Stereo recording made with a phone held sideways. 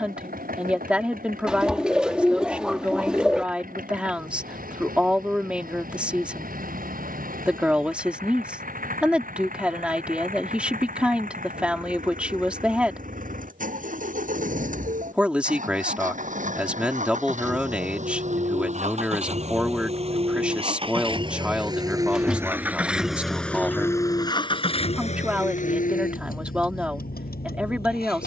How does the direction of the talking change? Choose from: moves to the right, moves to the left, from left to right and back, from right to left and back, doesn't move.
doesn't move.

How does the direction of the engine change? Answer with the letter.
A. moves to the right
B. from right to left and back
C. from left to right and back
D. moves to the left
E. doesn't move
D.